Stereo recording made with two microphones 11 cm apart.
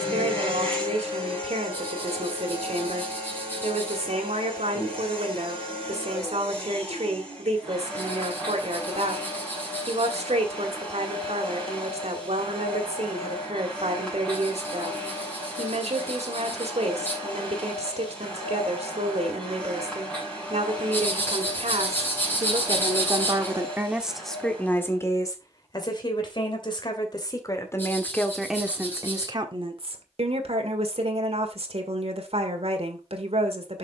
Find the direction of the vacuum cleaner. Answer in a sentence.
You can hear the vacuum cleaner in the centre.